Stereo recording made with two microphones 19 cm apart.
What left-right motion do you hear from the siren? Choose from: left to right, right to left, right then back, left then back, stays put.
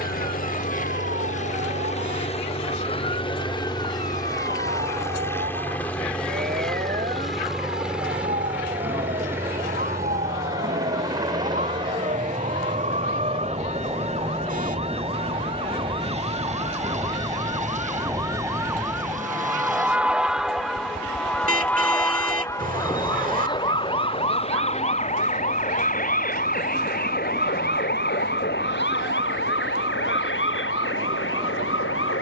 right to left.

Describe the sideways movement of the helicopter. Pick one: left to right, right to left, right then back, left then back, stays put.
left to right.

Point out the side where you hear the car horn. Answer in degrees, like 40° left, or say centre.
40° right.